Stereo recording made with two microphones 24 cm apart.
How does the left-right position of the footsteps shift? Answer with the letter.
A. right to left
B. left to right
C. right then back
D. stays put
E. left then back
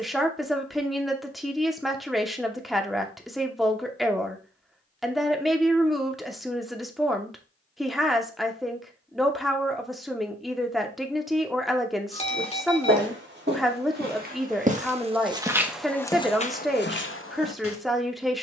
A.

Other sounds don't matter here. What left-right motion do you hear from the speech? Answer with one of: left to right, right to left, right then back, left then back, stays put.
stays put.